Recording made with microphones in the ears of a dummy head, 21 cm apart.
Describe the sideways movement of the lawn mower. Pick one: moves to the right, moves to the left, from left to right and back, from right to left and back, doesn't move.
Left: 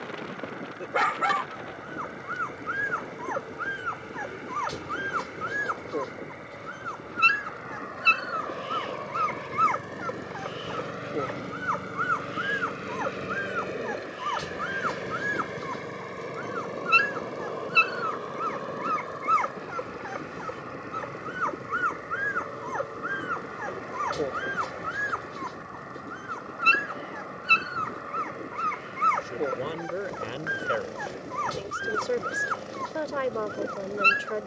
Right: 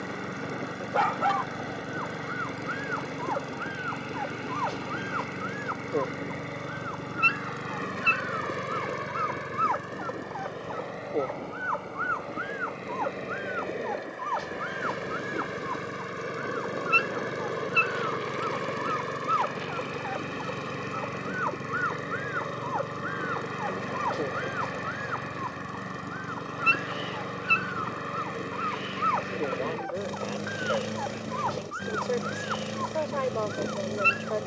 from right to left and back.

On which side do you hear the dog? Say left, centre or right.
left.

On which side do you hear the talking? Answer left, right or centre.
left.